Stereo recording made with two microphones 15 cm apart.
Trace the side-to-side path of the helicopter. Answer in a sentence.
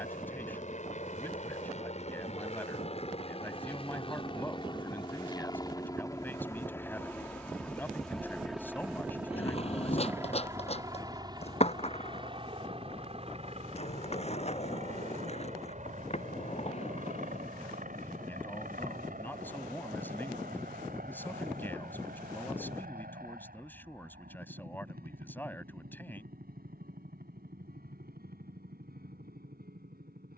You can hear the helicopter move to the right.